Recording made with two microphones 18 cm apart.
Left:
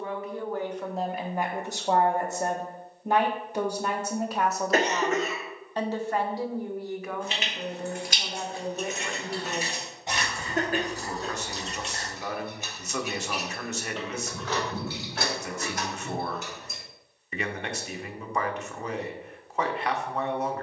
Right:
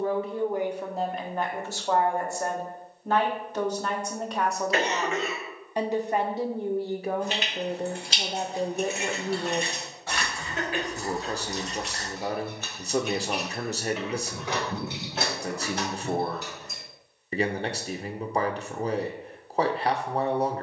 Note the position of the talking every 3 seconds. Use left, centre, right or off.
centre, centre, right, right, right, right, right.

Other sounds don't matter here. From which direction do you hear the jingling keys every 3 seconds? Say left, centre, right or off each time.
off, off, right, left, centre, right, off.